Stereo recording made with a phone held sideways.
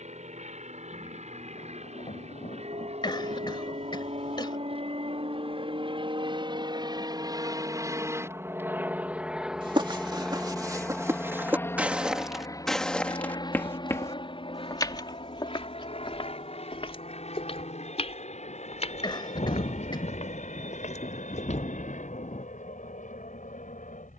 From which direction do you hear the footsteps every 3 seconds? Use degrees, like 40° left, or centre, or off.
off, off, off, 30° right, 10° left, 40° left, 60° left, 60° left.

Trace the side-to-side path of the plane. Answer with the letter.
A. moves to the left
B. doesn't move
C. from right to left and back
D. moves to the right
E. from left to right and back
A.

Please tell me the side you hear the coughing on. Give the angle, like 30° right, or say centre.
40° left.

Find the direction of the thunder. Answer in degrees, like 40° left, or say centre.
50° left.